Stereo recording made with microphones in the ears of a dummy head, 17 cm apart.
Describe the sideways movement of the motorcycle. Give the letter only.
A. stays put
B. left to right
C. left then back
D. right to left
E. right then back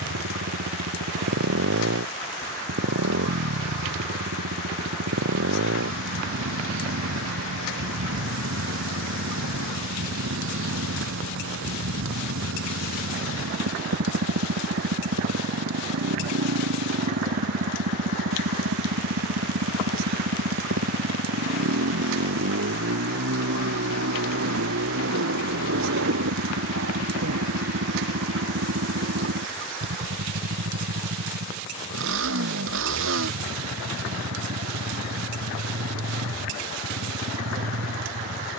A.